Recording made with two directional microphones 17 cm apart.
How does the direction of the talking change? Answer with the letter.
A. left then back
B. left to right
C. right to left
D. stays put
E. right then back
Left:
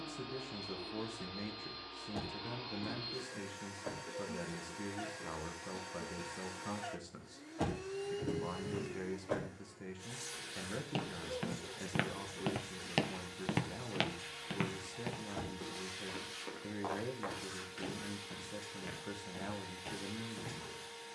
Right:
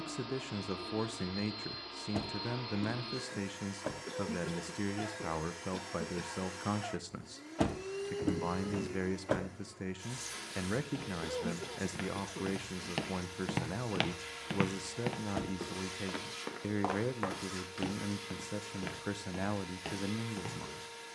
D.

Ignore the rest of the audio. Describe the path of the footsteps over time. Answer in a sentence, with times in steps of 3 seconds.
You can hear the footsteps not at all from 0 s, on the left from 9 s, in the centre from 12 s and on the right from 15 s.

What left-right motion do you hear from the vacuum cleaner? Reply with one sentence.
In this clip you hear the vacuum cleaner stay in one place.